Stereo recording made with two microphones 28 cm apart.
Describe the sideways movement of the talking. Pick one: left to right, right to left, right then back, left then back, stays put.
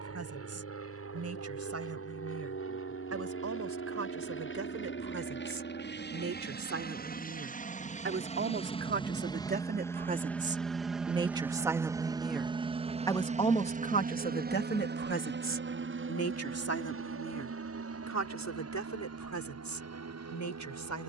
right to left.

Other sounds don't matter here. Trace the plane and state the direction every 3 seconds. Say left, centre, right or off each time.
left, left, left, centre, right, right, right.